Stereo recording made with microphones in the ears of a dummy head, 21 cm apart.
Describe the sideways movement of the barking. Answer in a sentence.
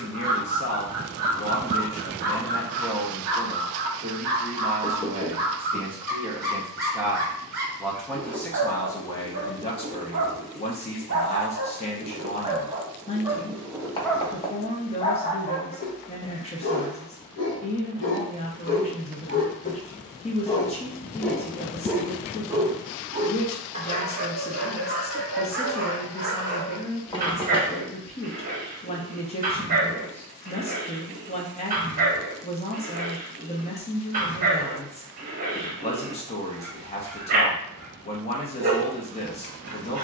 In this clip you hear the barking move from right to left and back again.